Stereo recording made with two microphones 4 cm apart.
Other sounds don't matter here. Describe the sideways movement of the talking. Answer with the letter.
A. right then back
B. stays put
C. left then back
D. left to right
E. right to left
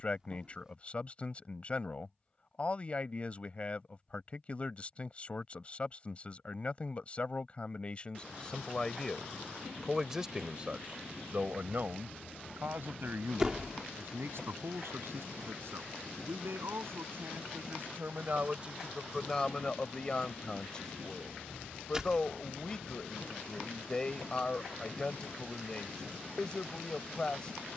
A.